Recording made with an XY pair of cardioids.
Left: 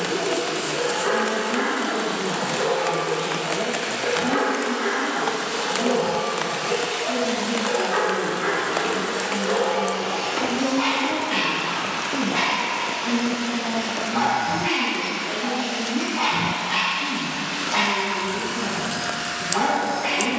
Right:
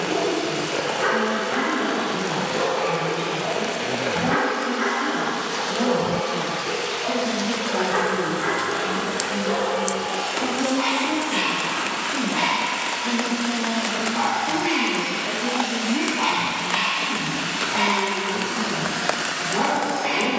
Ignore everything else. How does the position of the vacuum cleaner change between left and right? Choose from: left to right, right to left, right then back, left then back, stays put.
left to right.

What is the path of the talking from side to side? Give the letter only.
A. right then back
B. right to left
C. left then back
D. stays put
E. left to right
C.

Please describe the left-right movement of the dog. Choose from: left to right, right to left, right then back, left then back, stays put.
right to left.